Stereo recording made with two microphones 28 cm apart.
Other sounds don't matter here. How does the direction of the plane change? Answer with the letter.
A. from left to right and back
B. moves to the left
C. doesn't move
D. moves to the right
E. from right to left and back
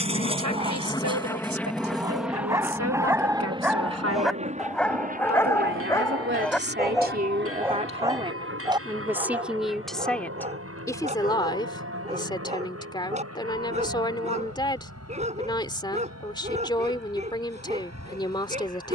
D.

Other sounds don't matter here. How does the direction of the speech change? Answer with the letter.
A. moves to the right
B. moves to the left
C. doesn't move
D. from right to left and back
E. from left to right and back
B.